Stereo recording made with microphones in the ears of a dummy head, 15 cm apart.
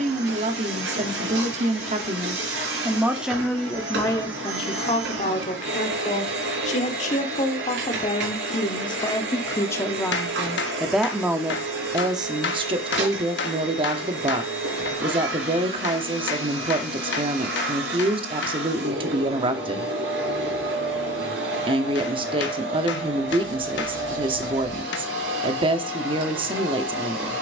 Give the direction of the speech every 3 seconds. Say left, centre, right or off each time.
right, left, left, centre, right, right, right, right, right.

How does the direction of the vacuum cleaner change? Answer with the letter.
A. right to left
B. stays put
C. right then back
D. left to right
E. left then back
B.